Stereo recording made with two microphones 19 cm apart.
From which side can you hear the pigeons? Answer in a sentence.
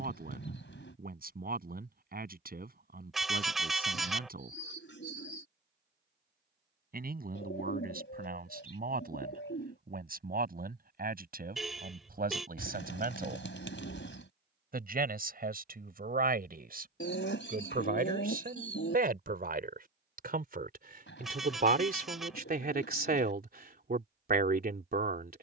You can hear the pigeons on the left.